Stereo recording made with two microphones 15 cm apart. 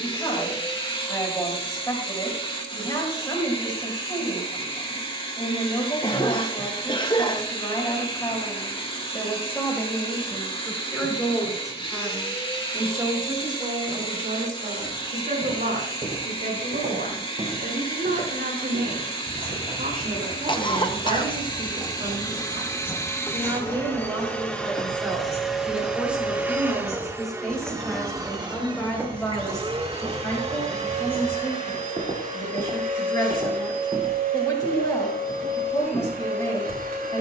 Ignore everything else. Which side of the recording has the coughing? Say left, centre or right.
left.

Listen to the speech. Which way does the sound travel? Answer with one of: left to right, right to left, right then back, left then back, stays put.
right then back.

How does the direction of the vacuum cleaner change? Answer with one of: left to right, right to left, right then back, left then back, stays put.
left to right.